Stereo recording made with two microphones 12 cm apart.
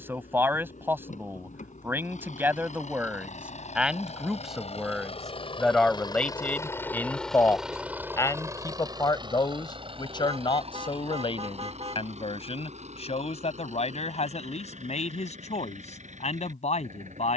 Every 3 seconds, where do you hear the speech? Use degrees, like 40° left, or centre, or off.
20° right, centre, 20° left, 40° left, 60° left, 60° left.